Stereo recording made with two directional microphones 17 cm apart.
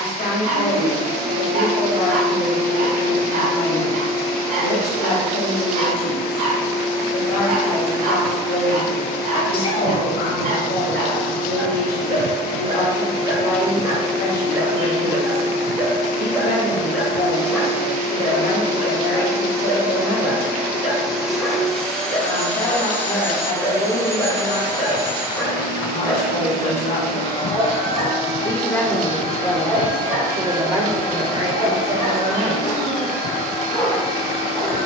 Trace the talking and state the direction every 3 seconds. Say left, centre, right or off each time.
left, left, left, left, left, left, left, left, left, centre, right, off.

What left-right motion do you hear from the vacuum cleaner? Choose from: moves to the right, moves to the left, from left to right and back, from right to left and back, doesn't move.
moves to the left.